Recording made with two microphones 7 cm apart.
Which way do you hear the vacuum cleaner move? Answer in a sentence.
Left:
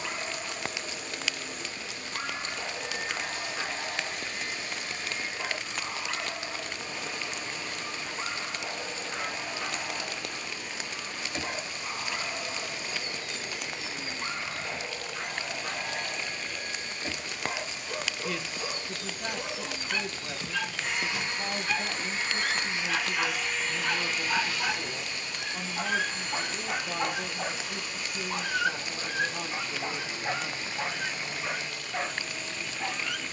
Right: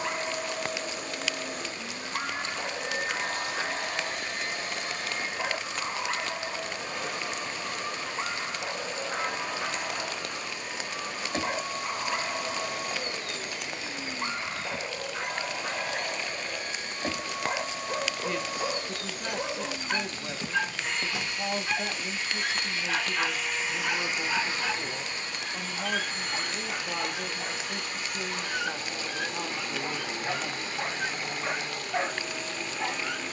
In this clip you hear the vacuum cleaner move from right to left and back again.